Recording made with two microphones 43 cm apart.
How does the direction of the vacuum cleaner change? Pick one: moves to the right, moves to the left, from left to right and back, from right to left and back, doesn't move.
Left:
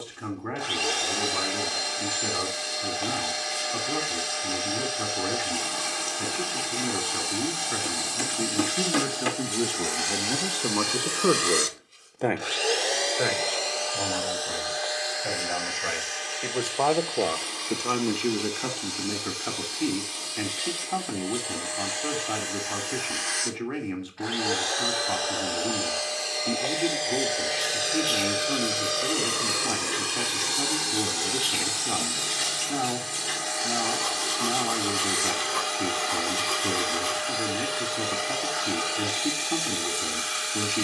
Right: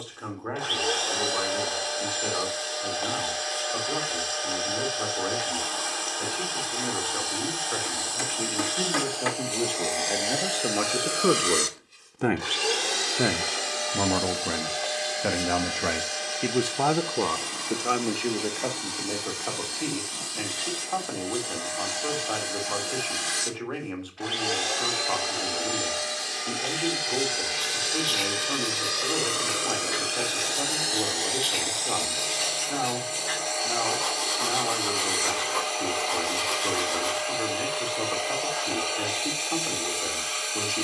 from left to right and back.